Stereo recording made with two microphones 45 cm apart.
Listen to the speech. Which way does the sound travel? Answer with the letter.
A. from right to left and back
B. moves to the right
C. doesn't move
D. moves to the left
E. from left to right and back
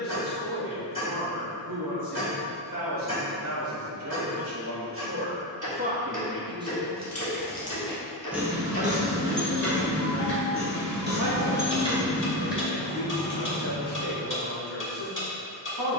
A.